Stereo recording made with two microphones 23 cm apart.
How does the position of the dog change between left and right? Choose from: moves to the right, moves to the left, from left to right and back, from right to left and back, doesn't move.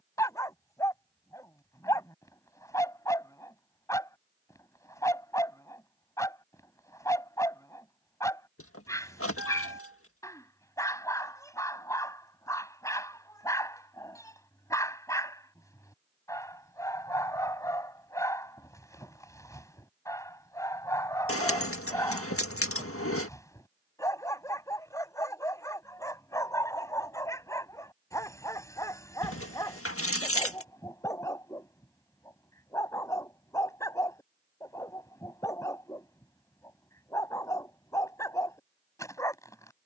doesn't move.